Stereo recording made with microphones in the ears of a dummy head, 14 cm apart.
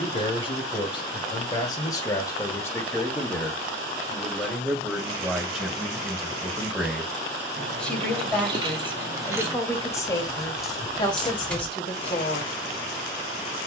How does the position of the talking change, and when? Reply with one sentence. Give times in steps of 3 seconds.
In this clip you hear the talking on the left from 0 s, in the centre from 3 s and on the left from 9 s.